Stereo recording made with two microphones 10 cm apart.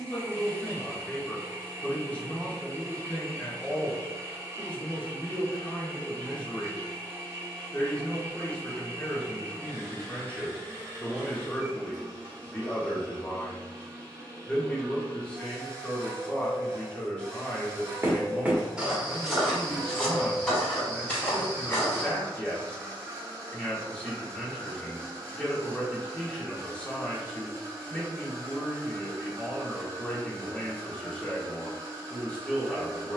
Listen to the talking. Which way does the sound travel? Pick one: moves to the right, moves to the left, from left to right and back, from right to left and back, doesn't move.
doesn't move.